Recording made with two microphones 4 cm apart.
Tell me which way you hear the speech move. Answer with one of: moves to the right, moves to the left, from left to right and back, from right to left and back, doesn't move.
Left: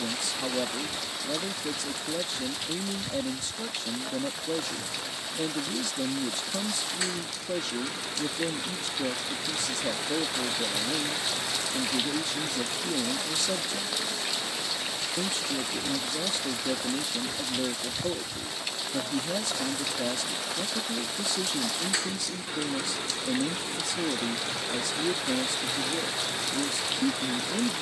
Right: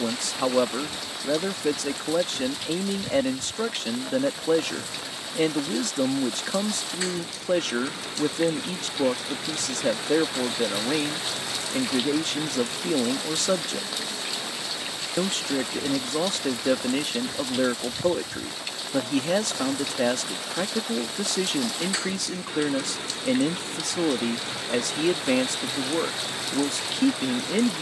doesn't move.